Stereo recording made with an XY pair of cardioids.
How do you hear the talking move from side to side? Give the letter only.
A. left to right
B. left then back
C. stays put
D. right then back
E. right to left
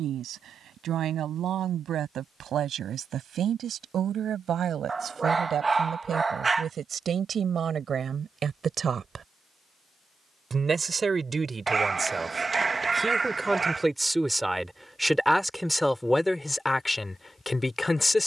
E.